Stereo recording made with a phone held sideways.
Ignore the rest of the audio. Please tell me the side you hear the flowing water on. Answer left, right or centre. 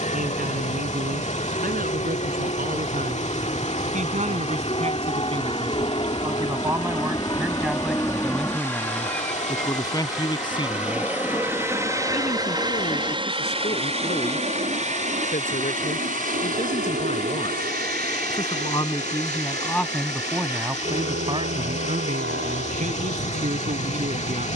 left.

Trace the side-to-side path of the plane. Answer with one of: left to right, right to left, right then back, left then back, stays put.
left to right.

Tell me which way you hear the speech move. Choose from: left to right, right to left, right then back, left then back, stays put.
left then back.